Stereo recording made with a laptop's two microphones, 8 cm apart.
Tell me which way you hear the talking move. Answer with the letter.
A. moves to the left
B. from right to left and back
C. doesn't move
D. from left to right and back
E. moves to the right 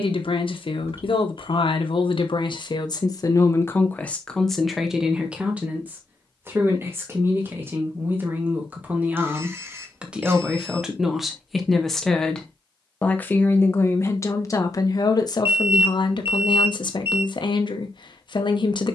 D.